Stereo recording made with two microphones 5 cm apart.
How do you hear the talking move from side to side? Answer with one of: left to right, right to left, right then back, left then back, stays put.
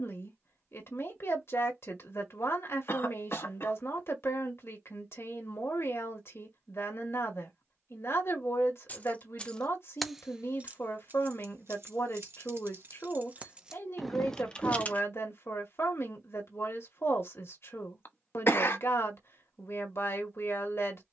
stays put.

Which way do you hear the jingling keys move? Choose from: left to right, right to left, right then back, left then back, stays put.
right then back.